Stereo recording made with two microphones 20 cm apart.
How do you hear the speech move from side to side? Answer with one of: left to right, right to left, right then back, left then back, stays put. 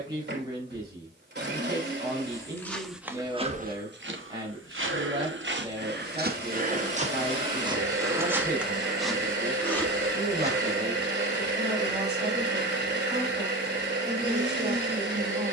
stays put.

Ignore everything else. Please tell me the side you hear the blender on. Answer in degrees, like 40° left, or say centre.
60° right.